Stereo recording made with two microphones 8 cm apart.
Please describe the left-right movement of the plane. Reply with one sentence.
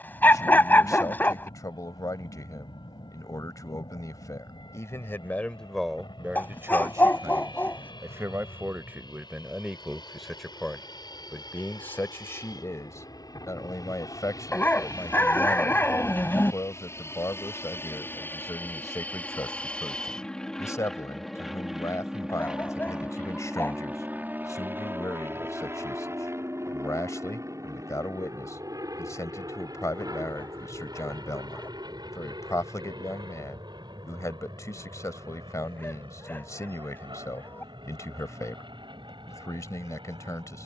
In this clip you hear the plane move from left to right.